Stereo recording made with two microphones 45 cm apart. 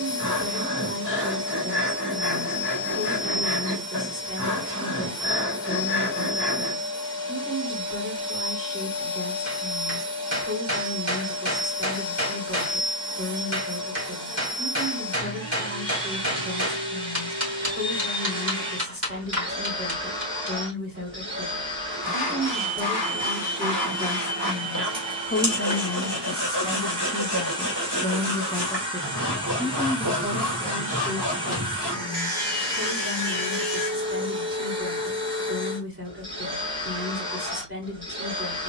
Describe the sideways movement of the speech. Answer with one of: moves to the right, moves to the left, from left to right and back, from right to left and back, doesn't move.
from right to left and back.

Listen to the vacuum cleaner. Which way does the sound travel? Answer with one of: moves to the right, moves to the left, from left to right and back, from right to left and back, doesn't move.
doesn't move.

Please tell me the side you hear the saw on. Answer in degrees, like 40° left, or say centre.
70° right.